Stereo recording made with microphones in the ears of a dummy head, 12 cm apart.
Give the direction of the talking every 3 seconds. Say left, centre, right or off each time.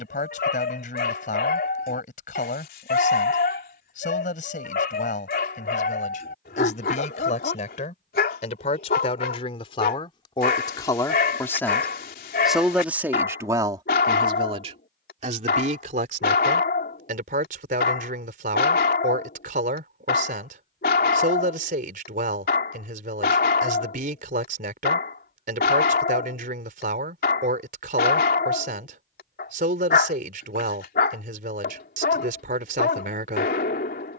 left, left, left, left, right, right, right, right, right, right, right, right.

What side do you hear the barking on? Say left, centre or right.
left.